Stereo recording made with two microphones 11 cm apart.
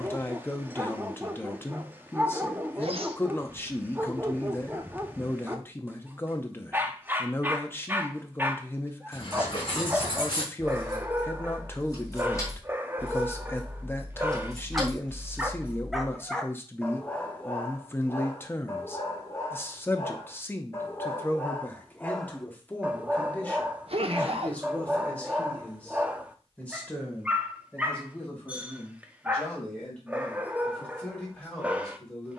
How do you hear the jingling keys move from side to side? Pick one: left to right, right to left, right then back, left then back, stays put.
left to right.